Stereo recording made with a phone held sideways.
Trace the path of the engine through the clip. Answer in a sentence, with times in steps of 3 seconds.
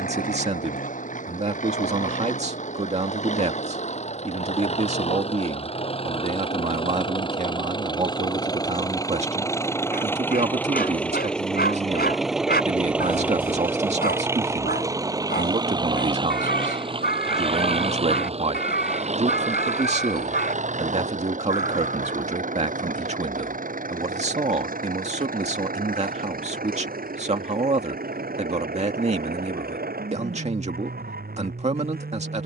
In this clip you hear the engine on the left from 0 s, in the centre from 9 s and on the right from 15 s.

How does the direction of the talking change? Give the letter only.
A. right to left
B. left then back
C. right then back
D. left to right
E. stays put
E.